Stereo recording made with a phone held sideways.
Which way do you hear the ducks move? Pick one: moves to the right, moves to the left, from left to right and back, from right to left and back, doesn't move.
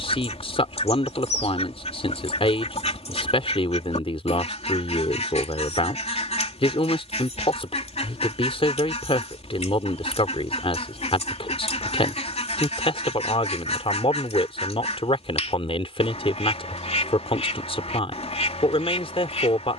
doesn't move.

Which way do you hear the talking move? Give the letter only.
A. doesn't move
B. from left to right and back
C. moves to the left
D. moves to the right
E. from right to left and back
A.